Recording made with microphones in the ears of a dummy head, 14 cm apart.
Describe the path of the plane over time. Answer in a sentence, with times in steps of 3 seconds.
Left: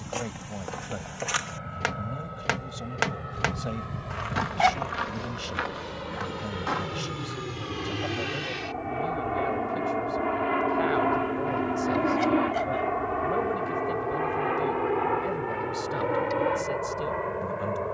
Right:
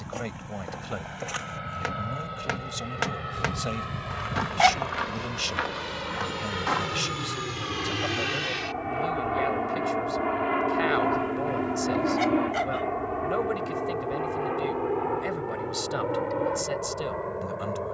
In this clip you hear the plane on the right from 0 s, in the centre from 9 s and on the left from 12 s.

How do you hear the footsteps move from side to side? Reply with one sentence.
In this clip you hear the footsteps travel towards the right.